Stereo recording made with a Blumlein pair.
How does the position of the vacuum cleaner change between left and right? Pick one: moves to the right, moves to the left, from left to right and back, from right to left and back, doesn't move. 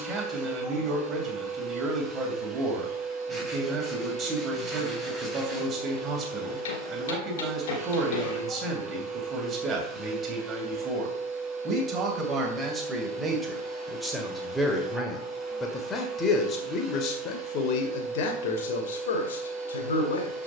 doesn't move.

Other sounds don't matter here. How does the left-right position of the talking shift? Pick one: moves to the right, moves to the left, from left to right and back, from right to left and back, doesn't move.
moves to the left.